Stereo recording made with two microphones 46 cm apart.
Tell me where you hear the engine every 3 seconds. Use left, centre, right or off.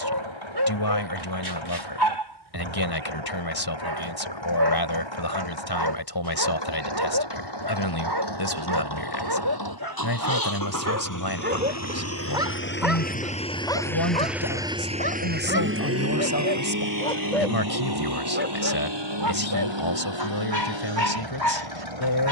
left, left, left, left, centre, right, right, right.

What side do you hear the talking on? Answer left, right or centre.
left.